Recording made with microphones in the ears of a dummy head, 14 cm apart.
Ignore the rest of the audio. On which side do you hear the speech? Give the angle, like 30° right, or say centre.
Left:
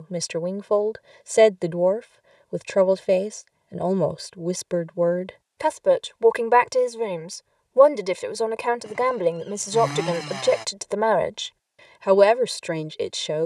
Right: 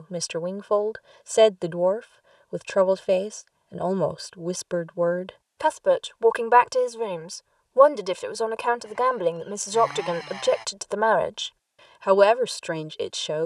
10° left.